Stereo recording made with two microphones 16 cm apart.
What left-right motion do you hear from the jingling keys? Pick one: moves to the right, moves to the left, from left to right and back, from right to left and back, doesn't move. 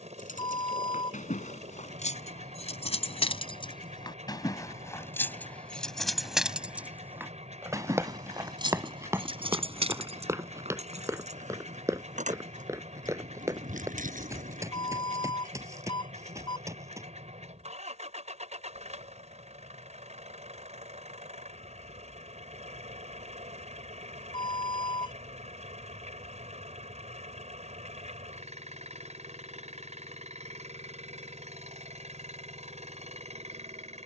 moves to the right.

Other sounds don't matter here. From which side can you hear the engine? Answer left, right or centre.
right.